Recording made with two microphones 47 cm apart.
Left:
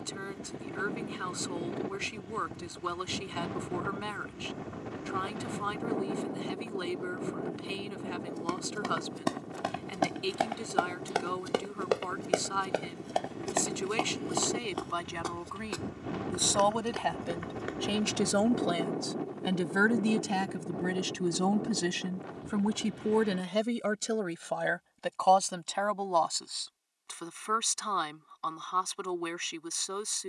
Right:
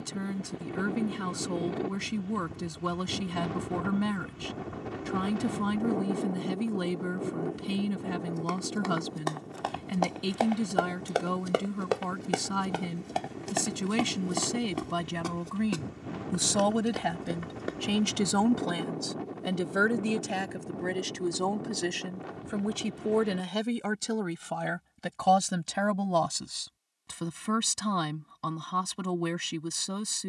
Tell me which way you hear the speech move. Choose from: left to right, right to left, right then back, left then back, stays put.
left then back.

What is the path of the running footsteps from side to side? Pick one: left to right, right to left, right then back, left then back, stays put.
left to right.